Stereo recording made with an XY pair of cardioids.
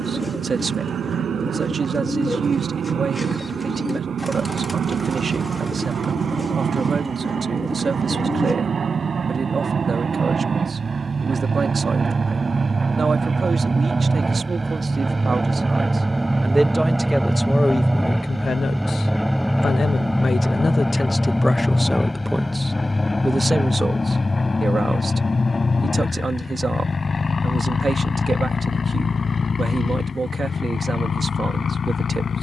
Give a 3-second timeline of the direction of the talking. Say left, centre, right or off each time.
right, right, right, right, right, centre, left, centre, right, right, right.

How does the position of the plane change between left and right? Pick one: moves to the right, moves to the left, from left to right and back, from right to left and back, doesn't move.
moves to the left.